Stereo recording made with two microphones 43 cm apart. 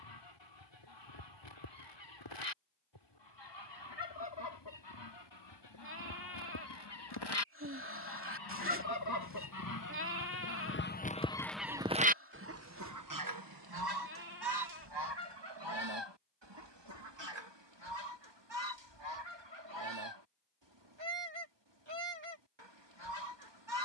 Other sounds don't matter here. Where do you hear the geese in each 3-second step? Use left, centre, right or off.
left, left, left, left, right, right, right, right.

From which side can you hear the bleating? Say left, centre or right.
right.